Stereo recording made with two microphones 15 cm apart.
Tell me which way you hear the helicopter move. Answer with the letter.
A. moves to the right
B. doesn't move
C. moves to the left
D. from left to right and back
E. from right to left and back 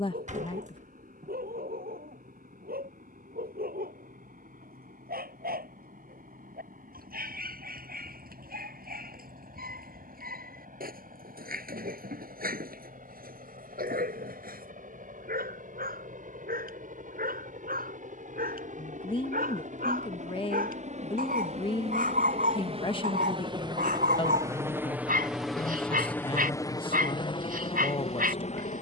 C.